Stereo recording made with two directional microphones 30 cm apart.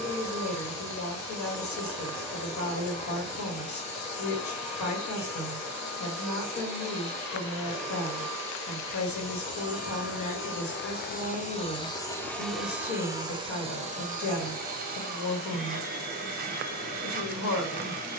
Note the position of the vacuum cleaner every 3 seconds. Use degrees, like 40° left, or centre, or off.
60° left, 60° left, 60° left, 40° left, 10° right, 30° right.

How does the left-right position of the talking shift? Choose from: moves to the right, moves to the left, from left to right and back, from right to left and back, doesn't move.
doesn't move.